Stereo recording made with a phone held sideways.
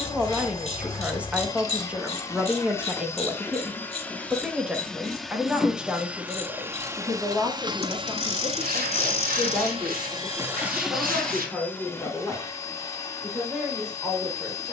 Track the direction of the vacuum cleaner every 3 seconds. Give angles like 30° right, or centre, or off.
20° left, 10° left, 30° right, 20° right, 20° left.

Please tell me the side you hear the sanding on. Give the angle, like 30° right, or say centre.
80° right.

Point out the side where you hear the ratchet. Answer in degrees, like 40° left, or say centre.
40° left.